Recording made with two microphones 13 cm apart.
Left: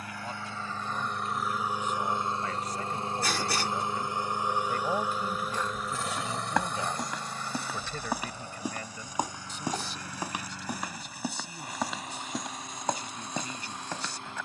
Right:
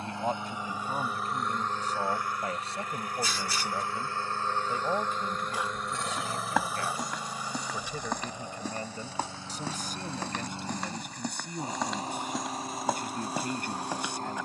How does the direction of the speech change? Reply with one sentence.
In this clip you hear the speech move from right to left and back again.